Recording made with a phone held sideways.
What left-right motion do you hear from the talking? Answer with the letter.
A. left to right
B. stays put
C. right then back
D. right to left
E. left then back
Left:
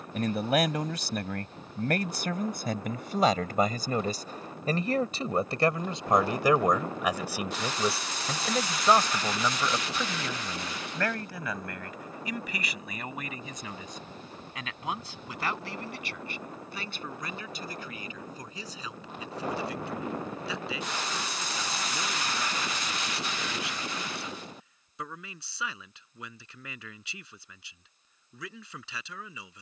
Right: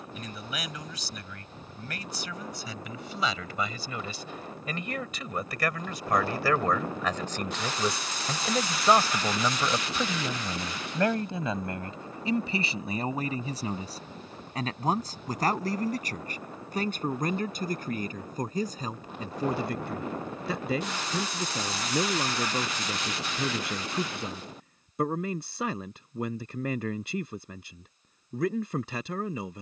A.